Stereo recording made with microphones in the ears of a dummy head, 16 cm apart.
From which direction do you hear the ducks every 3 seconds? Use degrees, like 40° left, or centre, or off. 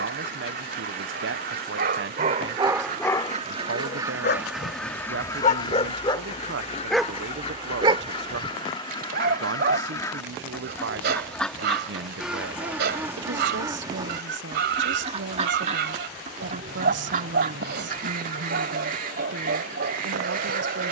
60° right, 10° right, 30° left, 10° left, 20° right, 40° right, 50° right.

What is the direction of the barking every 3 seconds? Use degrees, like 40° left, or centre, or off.
50° right, 40° left, 10° right, 60° right, 60° right, 60° right, 60° right.